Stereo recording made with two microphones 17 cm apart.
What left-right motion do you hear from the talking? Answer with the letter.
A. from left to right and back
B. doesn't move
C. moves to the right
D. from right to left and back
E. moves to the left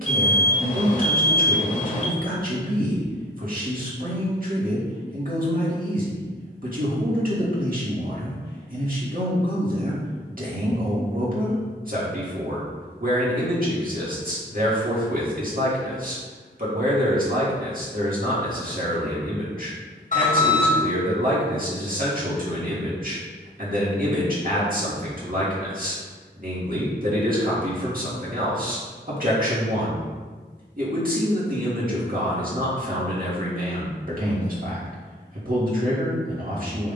B.